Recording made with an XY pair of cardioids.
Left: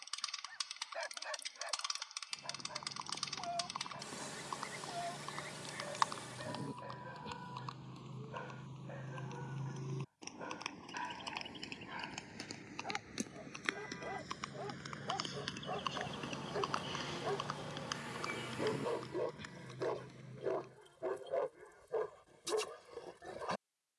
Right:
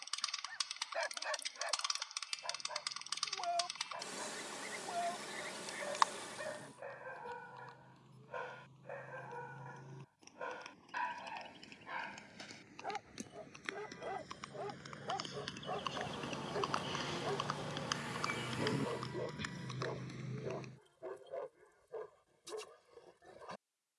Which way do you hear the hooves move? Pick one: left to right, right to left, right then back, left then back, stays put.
left to right.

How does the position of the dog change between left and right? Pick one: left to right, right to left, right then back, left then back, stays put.
right to left.